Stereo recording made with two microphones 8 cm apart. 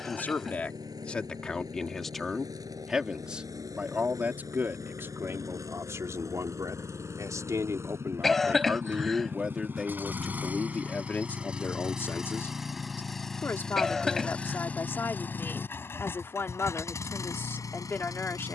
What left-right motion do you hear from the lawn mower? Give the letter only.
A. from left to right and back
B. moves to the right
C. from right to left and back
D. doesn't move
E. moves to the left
E.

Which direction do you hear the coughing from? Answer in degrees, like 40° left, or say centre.
centre.